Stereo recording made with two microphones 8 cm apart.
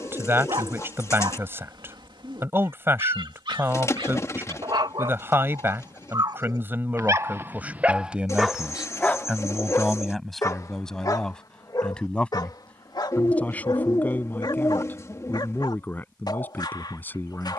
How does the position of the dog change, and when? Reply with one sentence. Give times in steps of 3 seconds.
In this clip you hear the dog on the right from 0 s and on the left from 9 s.